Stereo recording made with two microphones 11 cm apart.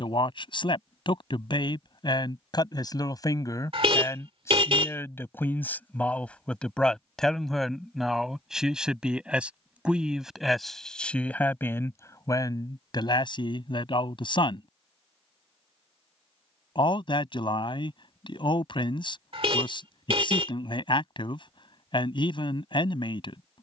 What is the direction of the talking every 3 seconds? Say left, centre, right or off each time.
left, left, centre, centre, left, left, left, left.